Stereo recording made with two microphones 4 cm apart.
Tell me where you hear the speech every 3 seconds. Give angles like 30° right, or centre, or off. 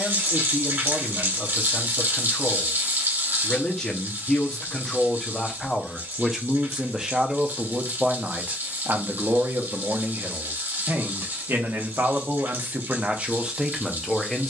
20° left, 20° left, 20° right, 60° right, 20° right.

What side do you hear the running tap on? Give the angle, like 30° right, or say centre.
60° right.